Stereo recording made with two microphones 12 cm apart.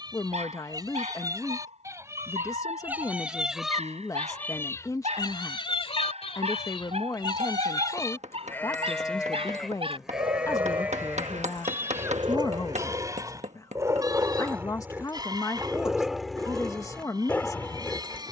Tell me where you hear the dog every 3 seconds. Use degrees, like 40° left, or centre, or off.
70° right, 70° right, 60° right, 50° right, 30° right, centre.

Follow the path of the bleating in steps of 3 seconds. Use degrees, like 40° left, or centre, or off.
30° right, 20° left, 40° left, 10° right, 30° right, 30° right.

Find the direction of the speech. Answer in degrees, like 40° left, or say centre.
30° left.